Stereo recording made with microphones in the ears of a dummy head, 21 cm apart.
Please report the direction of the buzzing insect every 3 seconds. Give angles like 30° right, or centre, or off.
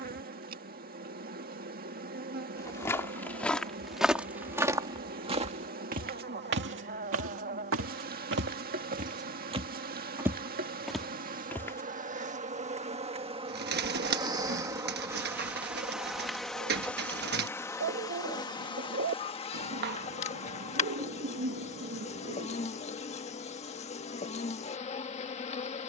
40° right, 40° right, 40° right, 40° right, 20° right, centre, 20° left, 30° left, 30° left.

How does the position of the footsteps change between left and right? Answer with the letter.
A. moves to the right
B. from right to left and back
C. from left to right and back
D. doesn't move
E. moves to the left
C.